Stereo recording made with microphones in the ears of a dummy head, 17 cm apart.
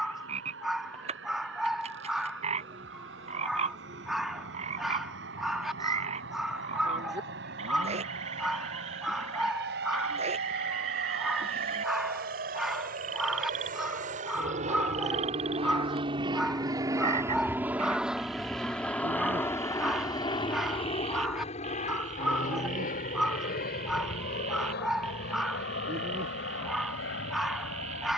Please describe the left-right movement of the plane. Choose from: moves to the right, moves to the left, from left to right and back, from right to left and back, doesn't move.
moves to the left.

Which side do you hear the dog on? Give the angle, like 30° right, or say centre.
centre.